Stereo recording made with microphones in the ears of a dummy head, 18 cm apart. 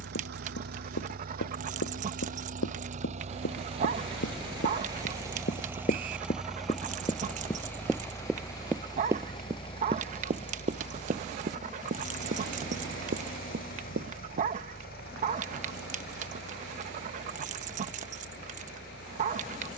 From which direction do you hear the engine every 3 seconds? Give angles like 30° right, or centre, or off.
50° right, 20° right, 10° left, 30° left, 50° left, 50° left, 60° left.